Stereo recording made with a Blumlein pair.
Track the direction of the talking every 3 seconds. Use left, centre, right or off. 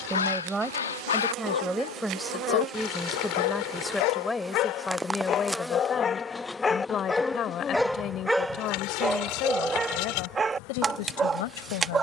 centre, centre, left, left.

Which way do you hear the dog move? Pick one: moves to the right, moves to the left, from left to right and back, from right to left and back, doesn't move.
moves to the right.